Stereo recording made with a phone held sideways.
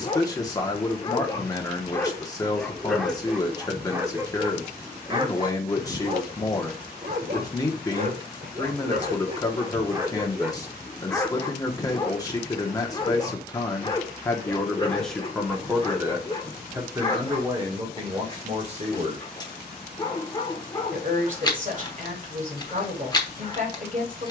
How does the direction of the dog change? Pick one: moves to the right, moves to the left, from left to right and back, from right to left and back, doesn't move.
from left to right and back.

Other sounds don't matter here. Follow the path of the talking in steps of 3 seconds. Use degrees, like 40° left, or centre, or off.
20° left, 20° left, 20° left, 20° left, 20° left, 20° right, 40° right, 50° right.